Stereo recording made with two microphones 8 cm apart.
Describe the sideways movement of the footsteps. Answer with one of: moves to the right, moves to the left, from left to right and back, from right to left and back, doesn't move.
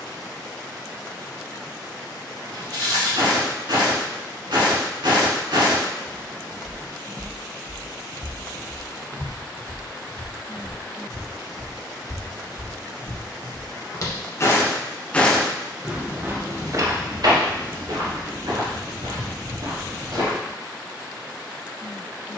from right to left and back.